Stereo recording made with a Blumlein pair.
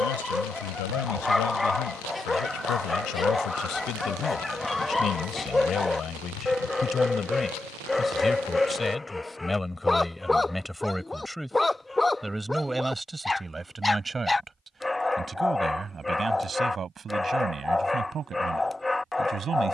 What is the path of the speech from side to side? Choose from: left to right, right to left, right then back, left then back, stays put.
left to right.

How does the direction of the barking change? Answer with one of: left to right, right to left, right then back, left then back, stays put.
stays put.